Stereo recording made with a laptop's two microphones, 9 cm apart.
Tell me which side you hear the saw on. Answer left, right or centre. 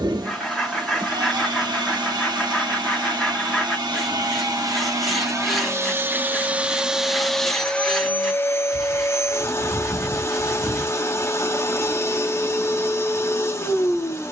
centre.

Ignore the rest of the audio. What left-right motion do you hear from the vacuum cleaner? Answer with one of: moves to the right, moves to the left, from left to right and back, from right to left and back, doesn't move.
moves to the left.